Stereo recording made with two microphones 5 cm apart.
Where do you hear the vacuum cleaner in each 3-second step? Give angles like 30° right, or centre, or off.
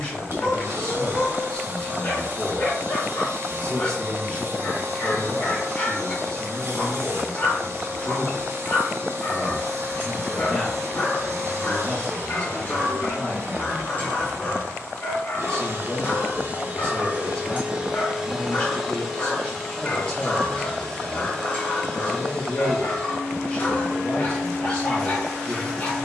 50° right, 50° right, 50° right, 50° right, 50° right, 40° right, 10° left, 20° left, 20° left.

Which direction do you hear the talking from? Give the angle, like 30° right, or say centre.
20° left.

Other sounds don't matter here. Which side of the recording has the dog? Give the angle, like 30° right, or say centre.
40° left.